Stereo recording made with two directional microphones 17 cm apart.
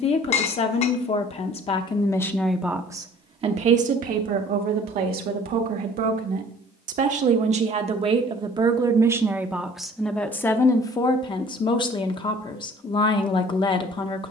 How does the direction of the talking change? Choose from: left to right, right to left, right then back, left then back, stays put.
right then back.